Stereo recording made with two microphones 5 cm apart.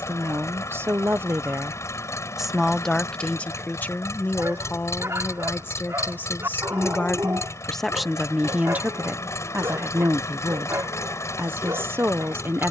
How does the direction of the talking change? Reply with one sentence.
You can hear the talking move from right to left and back again.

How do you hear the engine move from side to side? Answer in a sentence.
You can hear the engine stay in one place.